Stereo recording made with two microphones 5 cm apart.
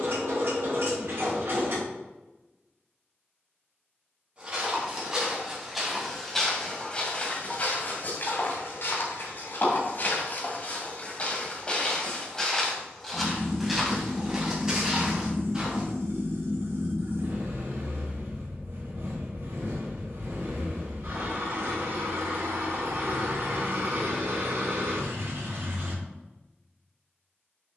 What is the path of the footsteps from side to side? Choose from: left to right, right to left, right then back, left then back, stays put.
left then back.